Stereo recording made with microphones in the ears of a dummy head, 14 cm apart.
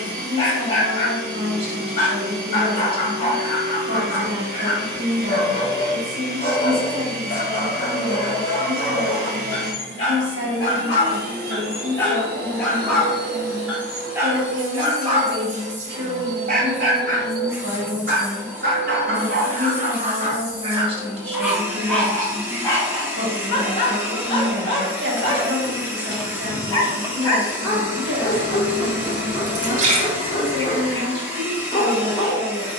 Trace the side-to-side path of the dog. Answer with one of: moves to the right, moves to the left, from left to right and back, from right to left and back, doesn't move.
from left to right and back.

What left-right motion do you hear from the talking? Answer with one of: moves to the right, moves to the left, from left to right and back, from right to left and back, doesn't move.
doesn't move.